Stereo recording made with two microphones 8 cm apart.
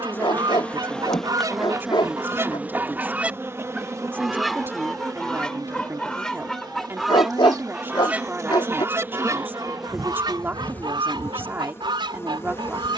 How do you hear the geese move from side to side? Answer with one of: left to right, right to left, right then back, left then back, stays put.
left then back.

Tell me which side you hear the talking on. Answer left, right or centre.
right.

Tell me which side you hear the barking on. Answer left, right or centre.
left.